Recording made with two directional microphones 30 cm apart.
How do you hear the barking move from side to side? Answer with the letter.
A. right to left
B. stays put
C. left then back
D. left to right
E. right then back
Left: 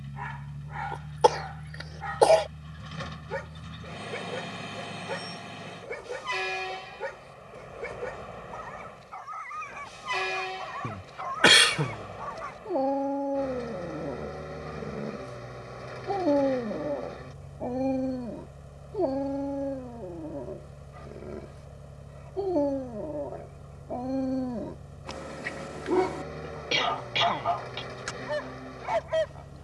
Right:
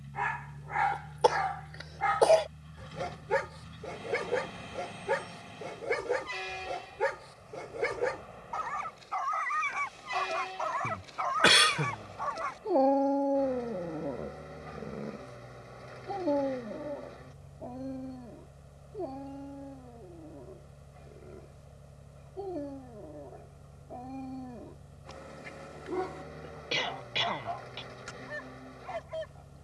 A.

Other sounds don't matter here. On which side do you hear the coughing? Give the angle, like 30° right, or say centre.
30° left.